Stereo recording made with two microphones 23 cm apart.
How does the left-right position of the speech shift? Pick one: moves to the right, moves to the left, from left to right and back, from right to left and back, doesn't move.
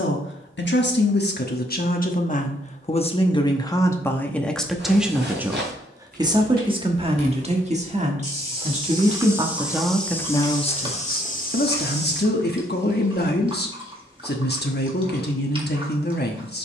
from left to right and back.